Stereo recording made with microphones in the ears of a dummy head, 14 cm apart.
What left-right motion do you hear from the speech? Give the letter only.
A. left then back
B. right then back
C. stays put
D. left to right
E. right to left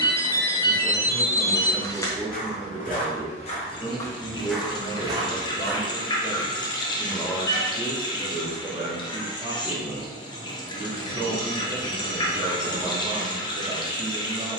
A.